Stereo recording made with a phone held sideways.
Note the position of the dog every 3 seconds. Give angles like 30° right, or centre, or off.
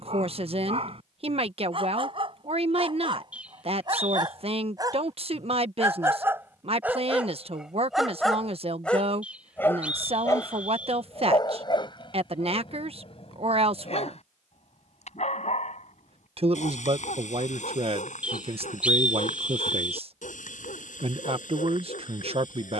40° right, 30° right, 10° right, 30° left, 50° left, 60° left, 70° left, 80° left.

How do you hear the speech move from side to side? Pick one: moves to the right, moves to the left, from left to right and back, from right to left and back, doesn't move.
doesn't move.